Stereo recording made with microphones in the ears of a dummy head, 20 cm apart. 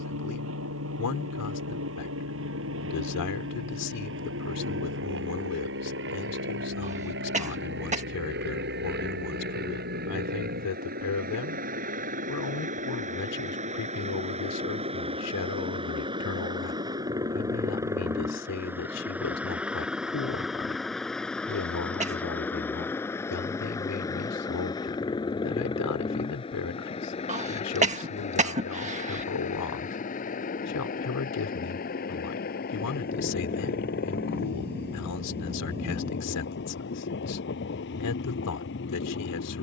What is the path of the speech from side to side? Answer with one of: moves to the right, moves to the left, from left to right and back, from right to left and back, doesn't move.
doesn't move.